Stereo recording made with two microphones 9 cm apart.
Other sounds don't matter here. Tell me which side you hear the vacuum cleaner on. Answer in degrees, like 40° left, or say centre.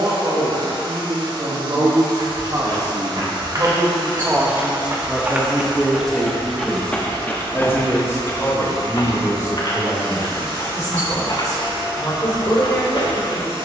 80° right.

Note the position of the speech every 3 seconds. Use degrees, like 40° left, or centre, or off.
50° right, 10° right, 20° left, 40° left, 50° left.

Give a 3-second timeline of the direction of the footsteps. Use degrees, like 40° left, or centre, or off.
50° right, 30° right, 20° left, 60° left, 70° left.